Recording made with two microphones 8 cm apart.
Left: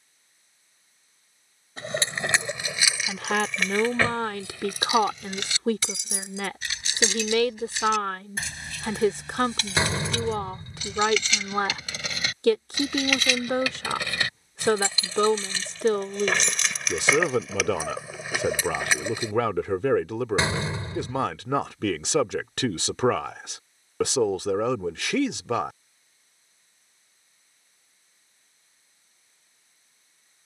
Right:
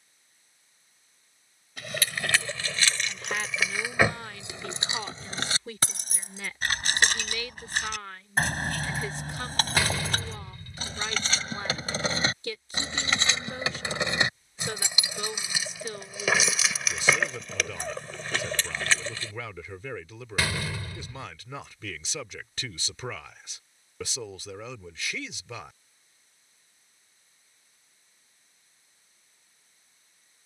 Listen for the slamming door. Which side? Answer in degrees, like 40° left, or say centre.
30° left.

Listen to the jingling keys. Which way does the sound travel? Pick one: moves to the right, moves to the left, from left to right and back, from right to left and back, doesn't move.
from left to right and back.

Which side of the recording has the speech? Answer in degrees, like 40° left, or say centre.
70° left.